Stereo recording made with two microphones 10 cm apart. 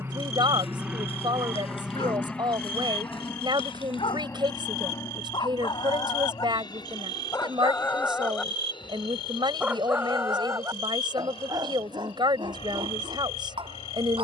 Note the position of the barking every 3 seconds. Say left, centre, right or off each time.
left, left, left, right, right.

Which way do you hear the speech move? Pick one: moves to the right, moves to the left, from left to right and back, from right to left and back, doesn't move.
doesn't move.